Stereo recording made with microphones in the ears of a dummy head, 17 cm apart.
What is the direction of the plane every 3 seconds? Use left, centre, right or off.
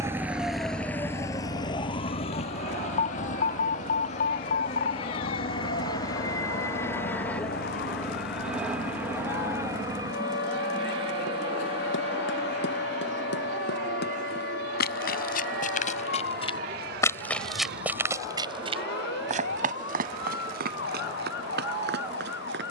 left, left, centre, right, right, right, right, right.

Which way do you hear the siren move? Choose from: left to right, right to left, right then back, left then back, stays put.
right to left.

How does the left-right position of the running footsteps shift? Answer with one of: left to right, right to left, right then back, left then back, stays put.
left to right.